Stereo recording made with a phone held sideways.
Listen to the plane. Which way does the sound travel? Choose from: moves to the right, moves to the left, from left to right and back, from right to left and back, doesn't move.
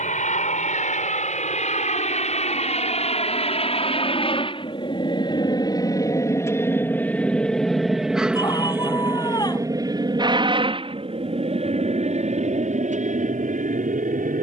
moves to the right.